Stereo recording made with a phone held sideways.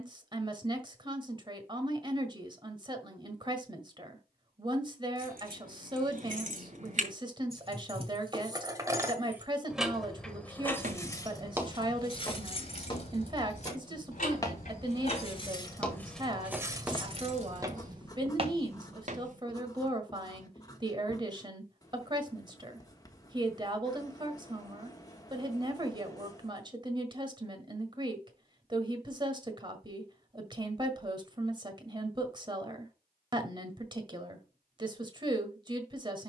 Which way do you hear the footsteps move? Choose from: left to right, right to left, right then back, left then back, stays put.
left then back.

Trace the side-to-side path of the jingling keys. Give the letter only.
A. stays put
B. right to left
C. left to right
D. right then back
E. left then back
E.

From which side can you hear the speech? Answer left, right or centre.
right.